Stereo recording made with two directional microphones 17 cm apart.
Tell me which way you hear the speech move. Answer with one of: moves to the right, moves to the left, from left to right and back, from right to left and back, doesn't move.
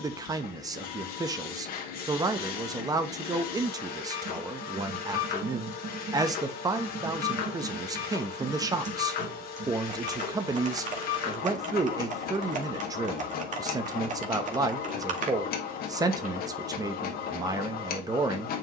doesn't move.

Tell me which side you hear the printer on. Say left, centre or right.
left.